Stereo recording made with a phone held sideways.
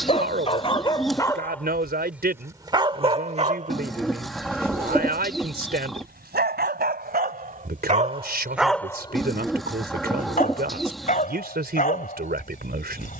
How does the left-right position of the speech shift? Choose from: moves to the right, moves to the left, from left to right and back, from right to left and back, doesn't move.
doesn't move.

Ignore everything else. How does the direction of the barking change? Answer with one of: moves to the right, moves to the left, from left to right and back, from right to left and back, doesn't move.
from left to right and back.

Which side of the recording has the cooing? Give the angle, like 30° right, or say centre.
centre.